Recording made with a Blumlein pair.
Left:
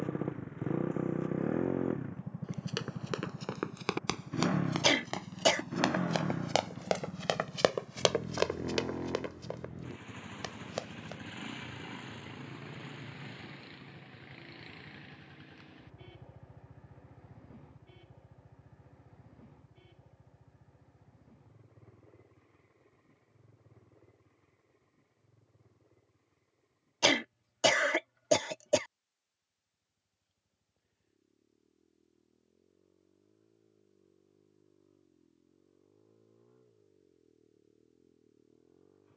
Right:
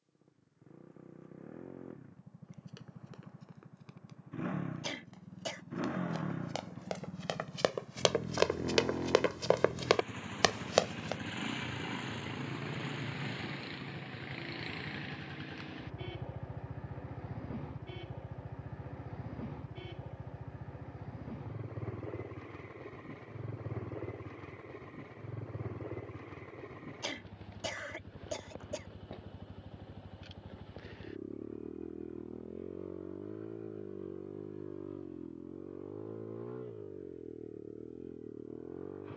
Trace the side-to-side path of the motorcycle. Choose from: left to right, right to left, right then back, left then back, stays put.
left to right.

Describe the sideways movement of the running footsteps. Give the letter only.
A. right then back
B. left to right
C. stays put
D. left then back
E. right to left
B.